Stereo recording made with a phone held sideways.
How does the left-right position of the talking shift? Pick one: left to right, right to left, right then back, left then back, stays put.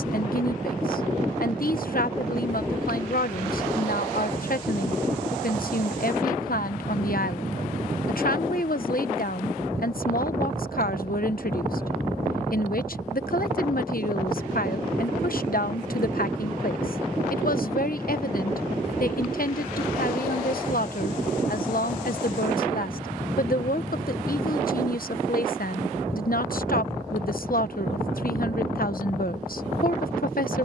stays put.